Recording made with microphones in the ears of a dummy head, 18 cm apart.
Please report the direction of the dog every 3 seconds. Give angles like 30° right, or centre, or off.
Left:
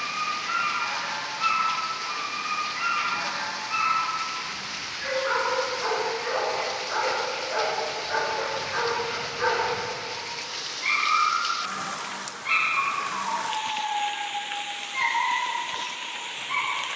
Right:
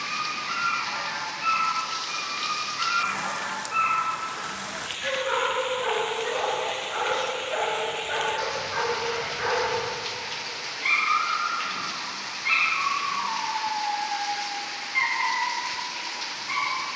60° left, 50° left, 20° left, centre, 20° right, 20° right.